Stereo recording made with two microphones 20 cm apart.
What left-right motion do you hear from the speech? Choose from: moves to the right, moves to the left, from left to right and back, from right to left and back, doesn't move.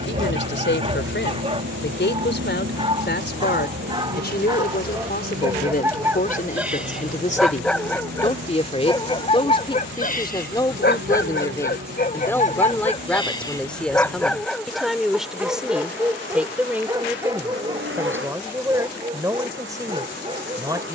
moves to the right.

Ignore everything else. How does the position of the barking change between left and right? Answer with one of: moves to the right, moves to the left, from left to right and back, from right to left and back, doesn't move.
from right to left and back.